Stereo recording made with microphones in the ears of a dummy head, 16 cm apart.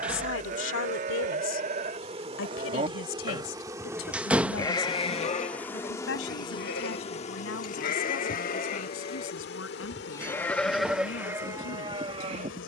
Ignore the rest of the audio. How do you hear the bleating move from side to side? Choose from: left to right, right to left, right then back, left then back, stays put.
left then back.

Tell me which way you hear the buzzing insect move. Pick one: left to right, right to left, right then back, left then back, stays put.
right to left.